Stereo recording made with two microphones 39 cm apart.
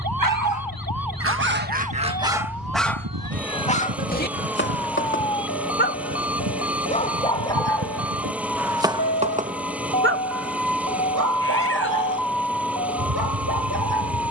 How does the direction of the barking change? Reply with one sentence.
In this clip you hear the barking move from right to left and back again.